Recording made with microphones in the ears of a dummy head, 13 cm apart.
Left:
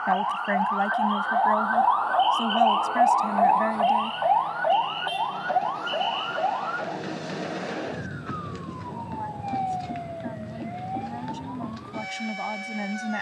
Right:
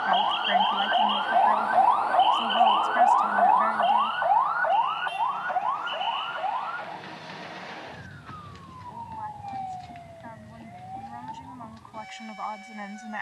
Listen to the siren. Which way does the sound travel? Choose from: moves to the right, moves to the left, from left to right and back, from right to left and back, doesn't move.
moves to the left.